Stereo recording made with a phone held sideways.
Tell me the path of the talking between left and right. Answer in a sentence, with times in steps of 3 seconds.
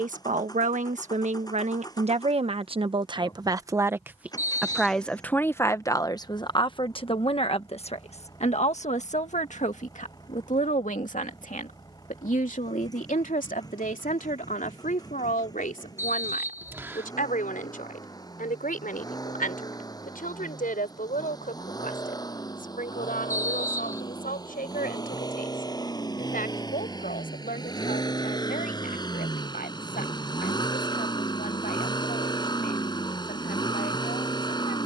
You can hear the talking on the right from 0 s, in the centre from 3 s and on the left from 6 s.